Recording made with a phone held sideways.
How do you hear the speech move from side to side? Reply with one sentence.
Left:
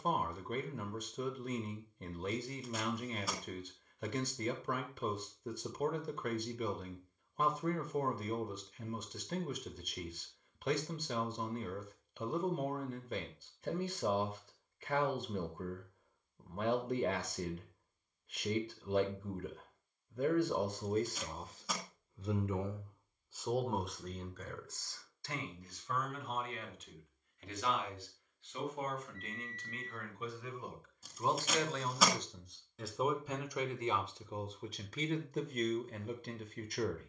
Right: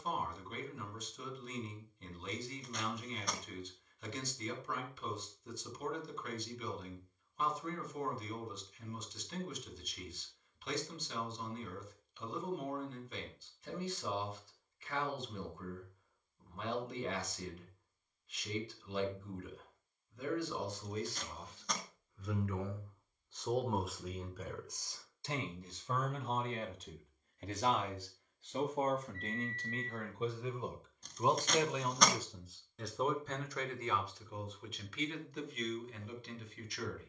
You can hear the speech move from left to right and back again.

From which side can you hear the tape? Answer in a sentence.
In this clip you hear the tape in the centre.